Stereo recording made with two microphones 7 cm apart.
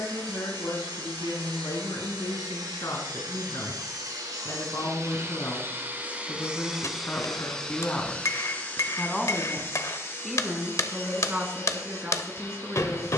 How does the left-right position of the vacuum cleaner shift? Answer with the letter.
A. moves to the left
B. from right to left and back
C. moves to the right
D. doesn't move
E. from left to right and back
A.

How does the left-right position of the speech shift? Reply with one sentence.
You can hear the speech go from the left side to the right.